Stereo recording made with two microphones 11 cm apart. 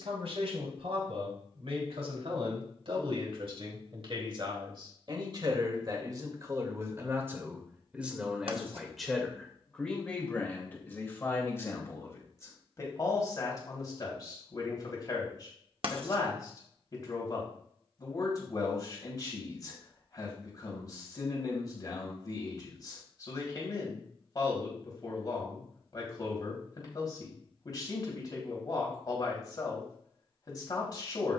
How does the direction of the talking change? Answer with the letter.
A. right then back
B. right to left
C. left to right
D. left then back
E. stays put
B.